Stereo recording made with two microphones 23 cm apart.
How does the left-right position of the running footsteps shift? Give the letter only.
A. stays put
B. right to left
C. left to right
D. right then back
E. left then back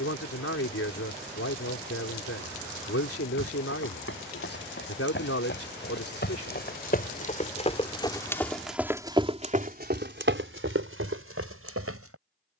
C.